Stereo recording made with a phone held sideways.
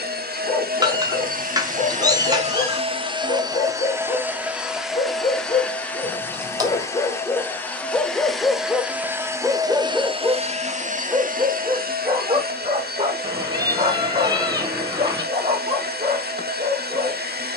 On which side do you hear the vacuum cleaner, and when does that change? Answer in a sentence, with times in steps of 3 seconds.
You can hear the vacuum cleaner on the right from 0 s, in the centre from 3 s and on the right from 9 s.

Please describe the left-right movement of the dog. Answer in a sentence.
In this clip you hear the dog travel towards the right.